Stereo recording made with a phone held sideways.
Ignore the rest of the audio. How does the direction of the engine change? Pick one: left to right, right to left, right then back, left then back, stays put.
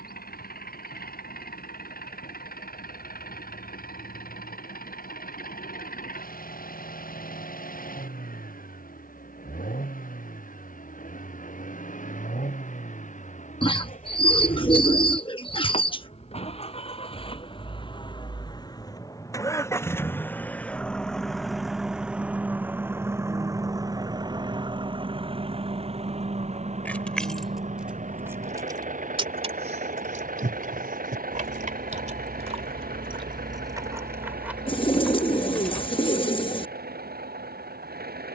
left to right.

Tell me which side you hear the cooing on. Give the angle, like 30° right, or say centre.
30° left.